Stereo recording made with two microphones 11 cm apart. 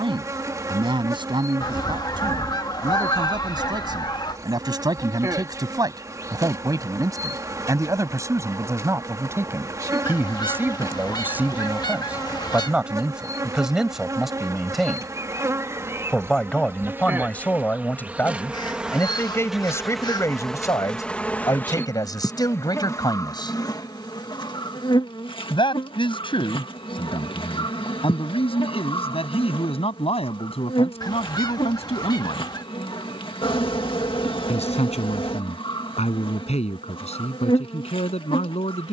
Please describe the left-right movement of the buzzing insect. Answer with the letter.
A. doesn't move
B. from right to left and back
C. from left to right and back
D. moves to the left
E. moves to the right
D.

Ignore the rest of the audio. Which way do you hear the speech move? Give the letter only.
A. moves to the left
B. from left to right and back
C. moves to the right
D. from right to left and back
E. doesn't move
A.